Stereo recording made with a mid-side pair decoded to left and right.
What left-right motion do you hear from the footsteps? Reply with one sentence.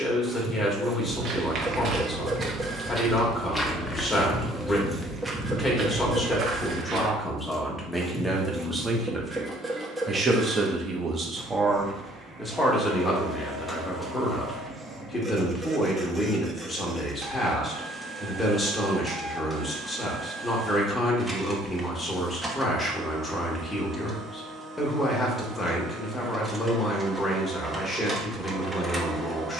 In this clip you hear the footsteps move from right to left and back again.